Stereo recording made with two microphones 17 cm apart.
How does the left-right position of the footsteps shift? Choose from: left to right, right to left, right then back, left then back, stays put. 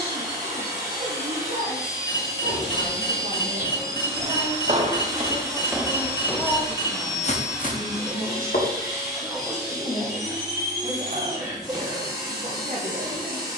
right to left.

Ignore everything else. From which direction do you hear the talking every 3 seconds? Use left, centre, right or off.
right, right, centre, right, right.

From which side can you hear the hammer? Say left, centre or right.
left.